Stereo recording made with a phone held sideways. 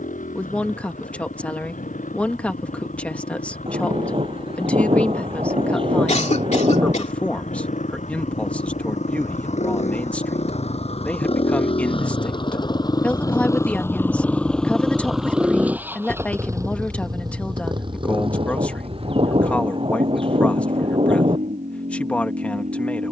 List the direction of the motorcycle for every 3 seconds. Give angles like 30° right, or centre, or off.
80° left, 80° left, 70° left, 50° left, 20° left, 20° right, 50° right, 60° right.